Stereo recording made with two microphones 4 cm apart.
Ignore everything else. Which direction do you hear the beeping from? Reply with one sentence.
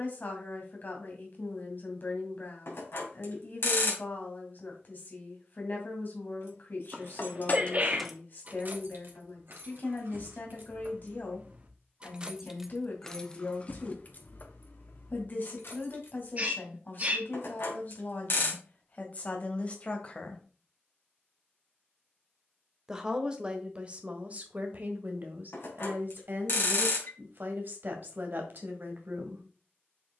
In this clip you hear the beeping on the left.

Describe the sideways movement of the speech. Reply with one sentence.
You can hear the speech travel towards the right.